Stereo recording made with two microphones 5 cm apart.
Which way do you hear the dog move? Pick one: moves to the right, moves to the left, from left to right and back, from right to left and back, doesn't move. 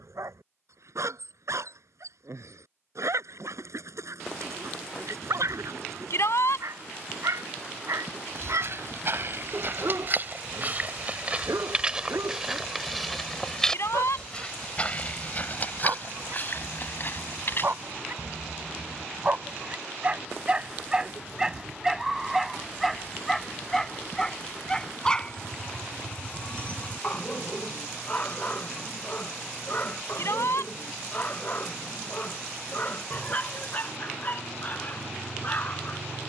moves to the left.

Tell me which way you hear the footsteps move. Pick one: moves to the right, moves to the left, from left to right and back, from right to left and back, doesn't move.
moves to the left.